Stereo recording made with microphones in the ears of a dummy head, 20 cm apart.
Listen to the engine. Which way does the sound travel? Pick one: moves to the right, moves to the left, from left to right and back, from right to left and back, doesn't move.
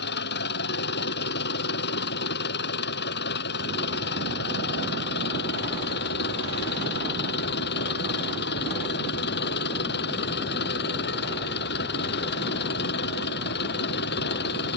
doesn't move.